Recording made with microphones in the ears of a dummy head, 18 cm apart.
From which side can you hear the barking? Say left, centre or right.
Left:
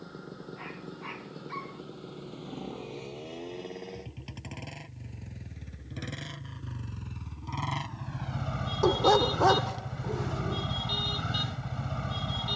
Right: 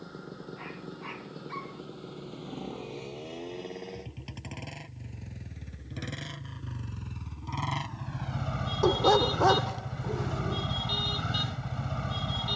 centre.